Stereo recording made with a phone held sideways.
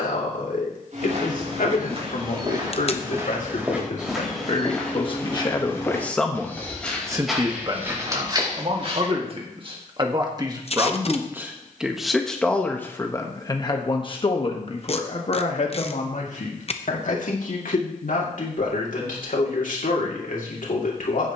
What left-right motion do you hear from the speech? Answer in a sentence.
You can hear the speech go right and come back.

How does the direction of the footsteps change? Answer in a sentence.
You can hear the footsteps go left and come back.